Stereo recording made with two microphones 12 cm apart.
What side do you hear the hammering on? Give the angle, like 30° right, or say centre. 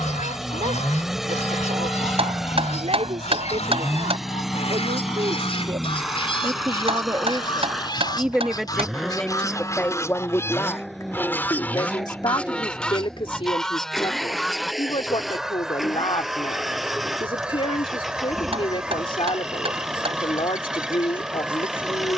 50° right.